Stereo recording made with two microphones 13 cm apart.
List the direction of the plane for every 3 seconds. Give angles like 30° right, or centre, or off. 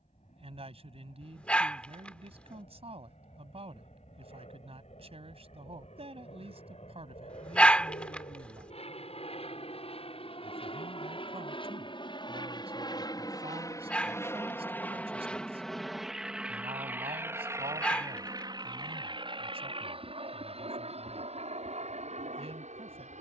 70° left, 70° left, 60° left, 50° left, 30° left, 10° right, 40° right, 50° right.